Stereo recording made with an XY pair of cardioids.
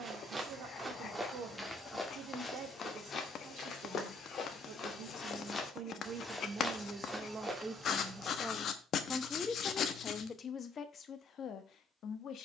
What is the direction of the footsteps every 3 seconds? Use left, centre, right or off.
centre, left, centre, off.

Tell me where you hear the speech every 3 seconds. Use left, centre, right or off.
right, right, right, left.